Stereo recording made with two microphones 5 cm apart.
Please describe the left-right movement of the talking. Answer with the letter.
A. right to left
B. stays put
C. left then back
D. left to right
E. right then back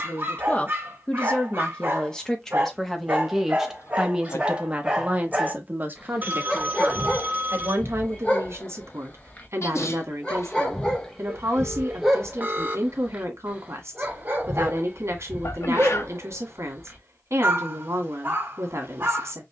D.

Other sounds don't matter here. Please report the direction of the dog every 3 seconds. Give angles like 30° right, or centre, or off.
40° right, 20° right, 20° left, 10° left, 20° right, 40° right, 40° right.